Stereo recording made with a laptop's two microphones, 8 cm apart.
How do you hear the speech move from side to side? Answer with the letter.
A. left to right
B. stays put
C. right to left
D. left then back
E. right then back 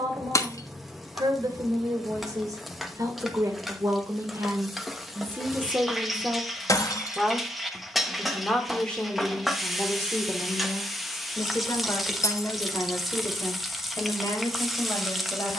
C.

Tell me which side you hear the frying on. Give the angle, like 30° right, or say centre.
centre.